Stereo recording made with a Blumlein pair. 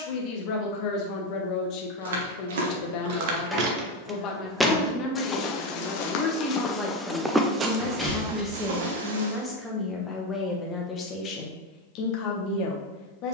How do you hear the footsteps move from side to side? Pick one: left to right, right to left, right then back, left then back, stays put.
left then back.